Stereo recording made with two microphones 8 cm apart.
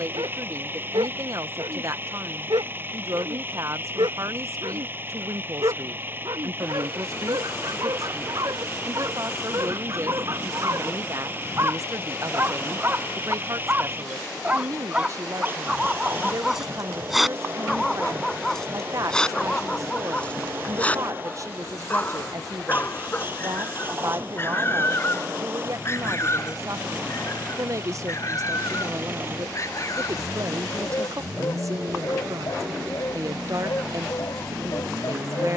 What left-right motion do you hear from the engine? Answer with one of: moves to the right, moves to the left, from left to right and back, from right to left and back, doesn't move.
doesn't move.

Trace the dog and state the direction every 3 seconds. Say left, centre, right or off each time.
right, right, right, right, right, centre, centre, left, left, left, left, left.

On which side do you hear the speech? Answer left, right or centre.
right.